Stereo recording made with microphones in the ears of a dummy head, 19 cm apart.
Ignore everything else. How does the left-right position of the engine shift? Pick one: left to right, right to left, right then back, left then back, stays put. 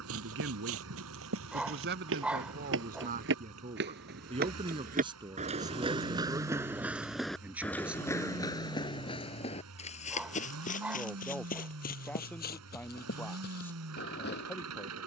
stays put.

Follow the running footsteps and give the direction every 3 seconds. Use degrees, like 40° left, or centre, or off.
70° right, 50° right, centre, 40° left, 50° left.